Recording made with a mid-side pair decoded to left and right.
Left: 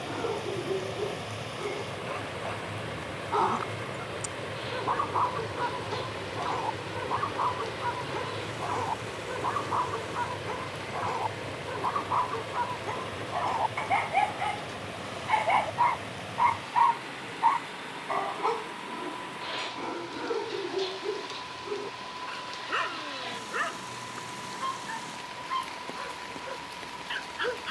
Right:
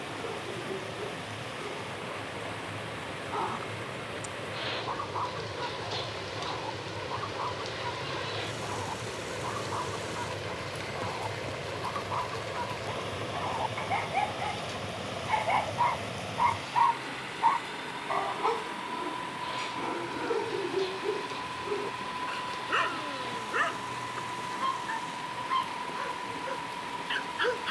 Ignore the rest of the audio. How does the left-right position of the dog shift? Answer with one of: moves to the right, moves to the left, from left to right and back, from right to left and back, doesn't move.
moves to the right.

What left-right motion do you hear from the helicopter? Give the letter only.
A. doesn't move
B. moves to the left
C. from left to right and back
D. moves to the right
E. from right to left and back
D.